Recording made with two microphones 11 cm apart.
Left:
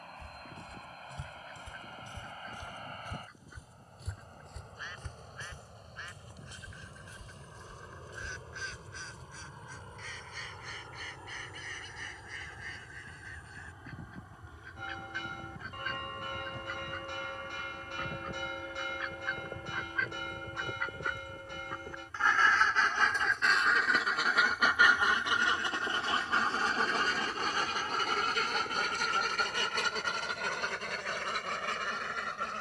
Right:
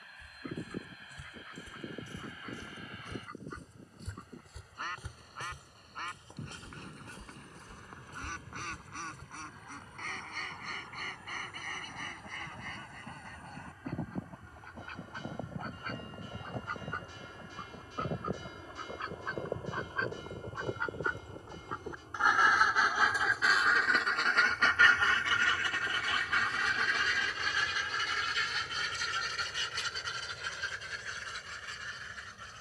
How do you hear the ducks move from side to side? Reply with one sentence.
You can hear the ducks go from the right side to the left.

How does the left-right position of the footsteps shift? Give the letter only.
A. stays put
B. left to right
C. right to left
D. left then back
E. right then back
B.